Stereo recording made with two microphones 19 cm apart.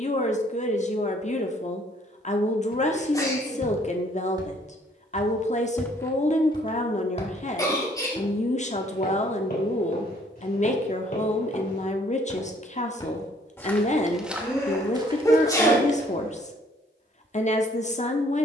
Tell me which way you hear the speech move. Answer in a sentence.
You can hear the speech stay in one place.